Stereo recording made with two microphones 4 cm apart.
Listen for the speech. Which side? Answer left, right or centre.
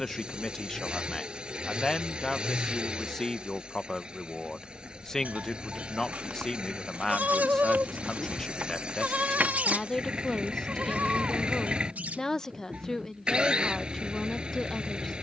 centre.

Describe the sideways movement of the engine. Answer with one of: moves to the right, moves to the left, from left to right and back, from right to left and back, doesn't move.
doesn't move.